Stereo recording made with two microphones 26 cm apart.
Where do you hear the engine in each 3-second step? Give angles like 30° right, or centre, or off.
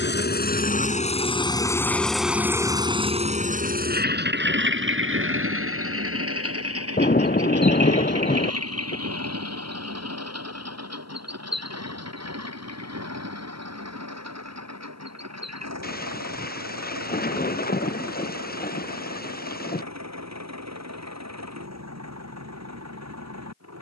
10° left, 40° right, 70° right, 70° right, 80° right, 80° right, 80° right, 80° right.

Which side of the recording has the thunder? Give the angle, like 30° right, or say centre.
40° left.